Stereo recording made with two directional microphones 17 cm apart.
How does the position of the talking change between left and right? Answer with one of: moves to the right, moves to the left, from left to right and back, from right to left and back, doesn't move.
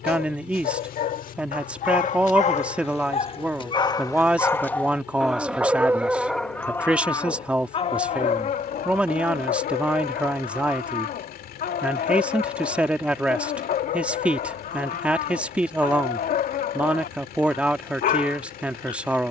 doesn't move.